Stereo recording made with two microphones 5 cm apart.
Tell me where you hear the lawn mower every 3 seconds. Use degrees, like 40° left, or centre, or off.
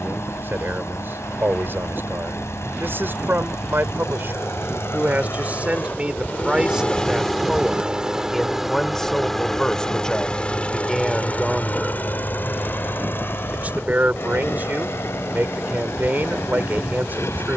70° left, 70° left, 10° left, 20° left, 50° left, 70° left.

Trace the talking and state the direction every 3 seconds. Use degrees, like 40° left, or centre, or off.
50° right, 40° right, 10° right, centre, 40° right, 40° right.